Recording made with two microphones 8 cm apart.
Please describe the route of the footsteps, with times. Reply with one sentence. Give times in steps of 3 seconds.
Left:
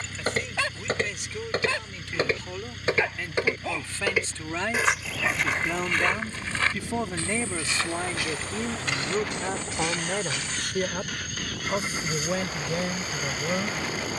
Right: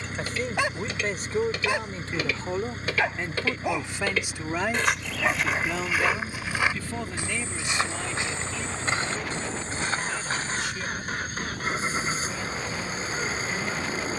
In this clip you hear the footsteps on the left from 0 s, in the centre from 3 s, on the right from 6 s and not at all from 12 s.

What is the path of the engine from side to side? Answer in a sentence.
You can hear the engine stay in one place.